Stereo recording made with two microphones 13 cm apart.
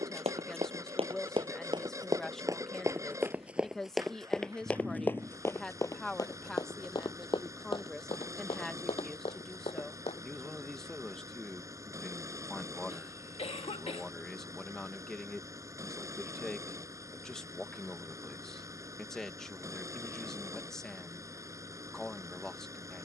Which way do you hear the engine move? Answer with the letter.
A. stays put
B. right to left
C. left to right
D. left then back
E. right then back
A.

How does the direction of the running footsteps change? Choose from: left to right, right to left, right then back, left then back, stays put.
right to left.